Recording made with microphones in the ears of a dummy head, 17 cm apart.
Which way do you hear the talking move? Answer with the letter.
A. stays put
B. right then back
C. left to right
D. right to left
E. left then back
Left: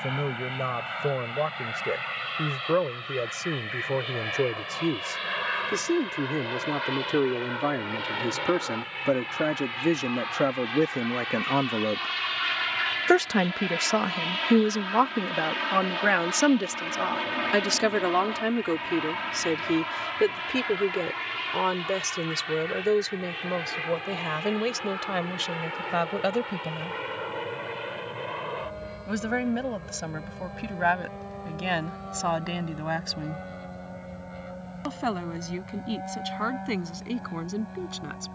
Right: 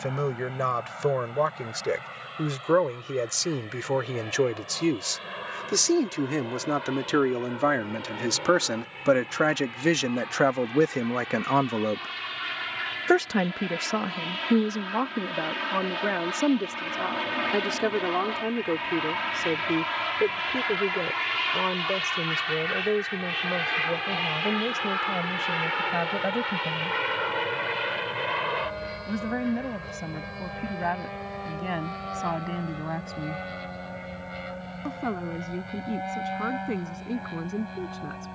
D.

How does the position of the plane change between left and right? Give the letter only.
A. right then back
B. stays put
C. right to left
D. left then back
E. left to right
E.